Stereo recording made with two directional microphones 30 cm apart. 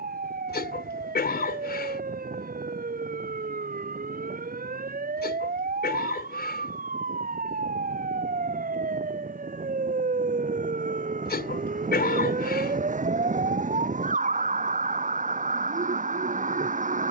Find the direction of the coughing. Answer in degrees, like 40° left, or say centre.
30° left.